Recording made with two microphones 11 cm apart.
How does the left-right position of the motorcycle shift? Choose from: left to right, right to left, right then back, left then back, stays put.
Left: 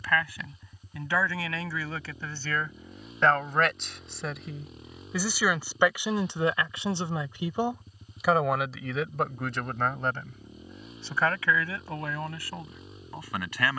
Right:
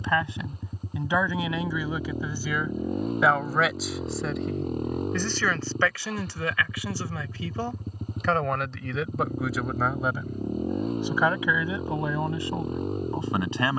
stays put.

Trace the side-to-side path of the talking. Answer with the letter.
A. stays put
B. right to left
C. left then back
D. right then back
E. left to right
C.